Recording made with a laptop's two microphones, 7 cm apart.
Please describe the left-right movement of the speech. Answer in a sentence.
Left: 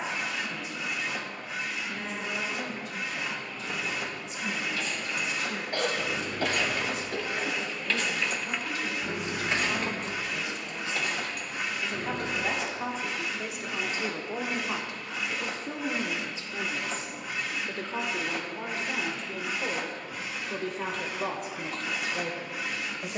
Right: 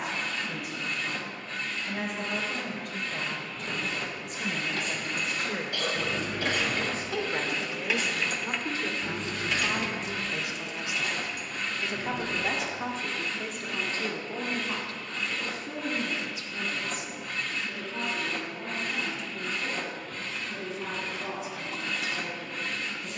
In this clip you hear the speech move to the left.